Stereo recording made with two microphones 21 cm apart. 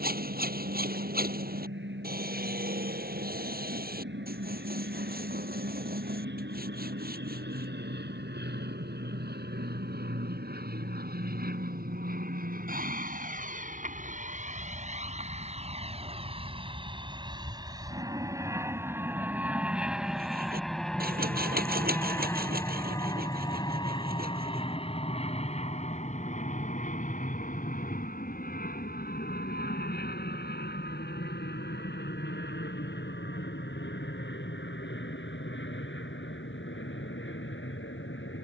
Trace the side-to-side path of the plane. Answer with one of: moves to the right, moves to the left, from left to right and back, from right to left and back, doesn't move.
moves to the left.